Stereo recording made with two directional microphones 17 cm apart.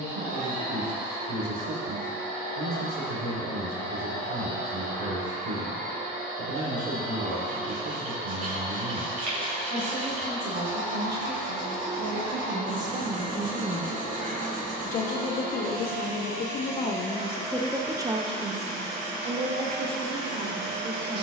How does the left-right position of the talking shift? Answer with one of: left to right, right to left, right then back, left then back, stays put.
left then back.